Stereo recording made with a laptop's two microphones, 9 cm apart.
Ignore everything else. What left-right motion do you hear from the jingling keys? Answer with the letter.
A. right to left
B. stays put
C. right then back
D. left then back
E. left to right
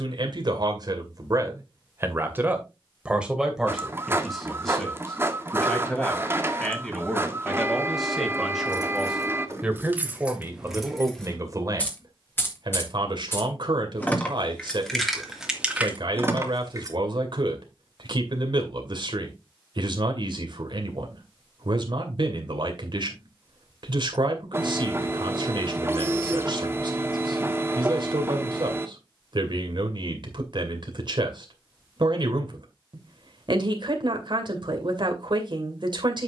D.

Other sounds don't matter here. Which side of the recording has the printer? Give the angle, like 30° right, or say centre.
30° right.